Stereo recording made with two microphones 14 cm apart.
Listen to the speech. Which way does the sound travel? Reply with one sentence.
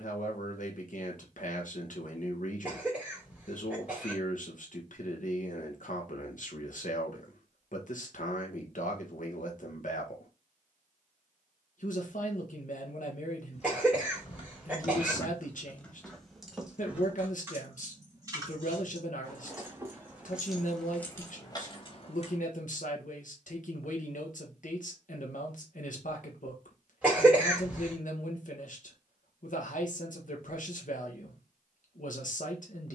You can hear the speech stay put.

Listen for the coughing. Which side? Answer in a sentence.
You can hear the coughing in the centre.